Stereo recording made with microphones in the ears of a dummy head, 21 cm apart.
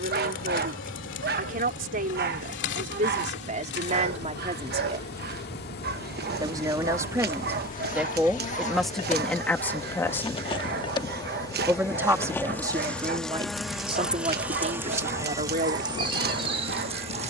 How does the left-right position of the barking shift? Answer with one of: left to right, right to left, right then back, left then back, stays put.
stays put.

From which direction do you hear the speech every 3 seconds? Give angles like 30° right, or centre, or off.
30° right, 30° right, 10° right, centre, 20° right, 30° right.